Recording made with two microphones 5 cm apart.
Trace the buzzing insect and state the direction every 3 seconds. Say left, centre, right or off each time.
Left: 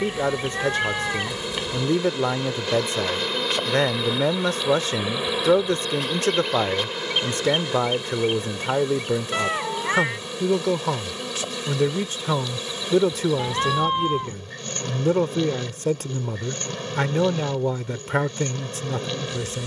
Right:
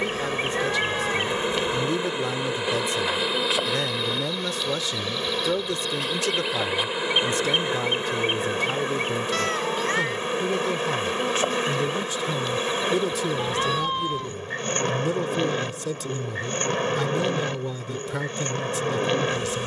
right, centre, right, right, right, right, right.